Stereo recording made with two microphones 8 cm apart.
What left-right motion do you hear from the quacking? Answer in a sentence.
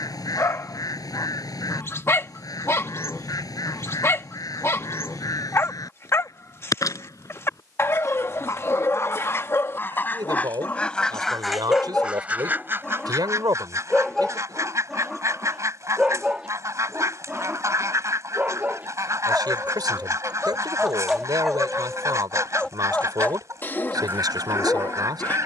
In this clip you hear the quacking move to the right.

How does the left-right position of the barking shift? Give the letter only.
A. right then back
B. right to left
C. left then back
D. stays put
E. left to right
A.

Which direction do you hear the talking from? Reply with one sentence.
You can hear the talking on the right.